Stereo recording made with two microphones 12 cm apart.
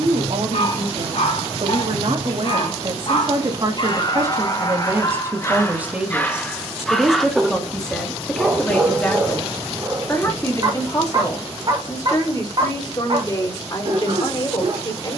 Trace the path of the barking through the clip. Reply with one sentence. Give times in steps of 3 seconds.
In this clip you hear the barking on the left from 0 s, in the centre from 6 s and on the right from 9 s.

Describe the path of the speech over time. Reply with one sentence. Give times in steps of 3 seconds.
You can hear the speech on the right from 0 s, in the centre from 6 s and on the left from 9 s.